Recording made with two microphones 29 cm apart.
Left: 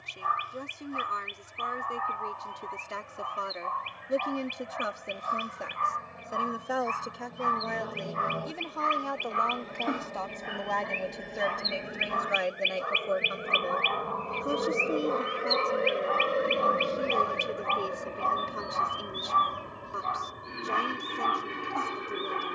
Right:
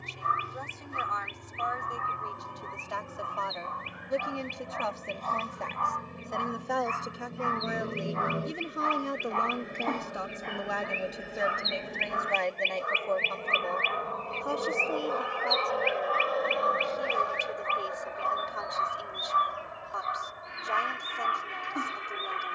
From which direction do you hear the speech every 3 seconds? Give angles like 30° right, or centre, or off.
30° left, 20° left, 10° right, 10° right, 20° left, 30° left, 30° left, 30° left.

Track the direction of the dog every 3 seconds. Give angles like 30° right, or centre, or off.
30° right, centre, 40° left, centre, 20° right, 20° right, 20° right, 20° right.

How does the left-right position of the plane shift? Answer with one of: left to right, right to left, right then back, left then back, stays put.
right to left.